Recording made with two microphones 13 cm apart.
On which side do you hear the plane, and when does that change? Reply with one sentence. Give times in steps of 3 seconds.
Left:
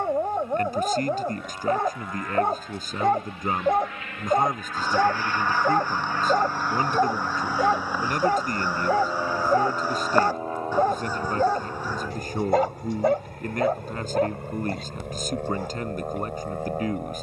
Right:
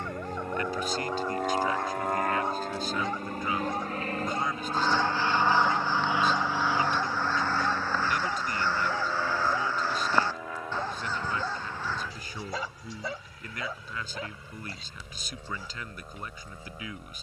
In this clip you hear the plane on the right from 0 s, in the centre from 6 s and on the left from 9 s.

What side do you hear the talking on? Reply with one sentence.
In this clip you hear the talking on the left.